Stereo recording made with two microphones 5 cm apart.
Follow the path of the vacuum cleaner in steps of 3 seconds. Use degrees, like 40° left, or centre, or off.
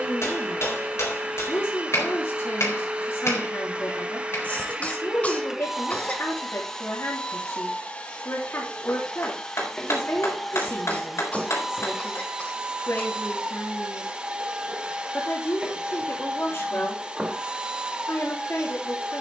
20° right, 20° right, 20° left, centre, 20° right, 20° right, 20° right.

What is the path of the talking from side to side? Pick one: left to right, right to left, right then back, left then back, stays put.
stays put.